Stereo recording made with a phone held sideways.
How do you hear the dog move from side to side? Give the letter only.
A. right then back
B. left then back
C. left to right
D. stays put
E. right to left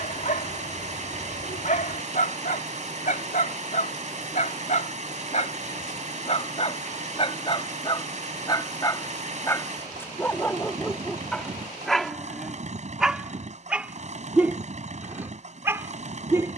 C.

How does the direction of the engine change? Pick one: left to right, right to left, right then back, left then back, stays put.
stays put.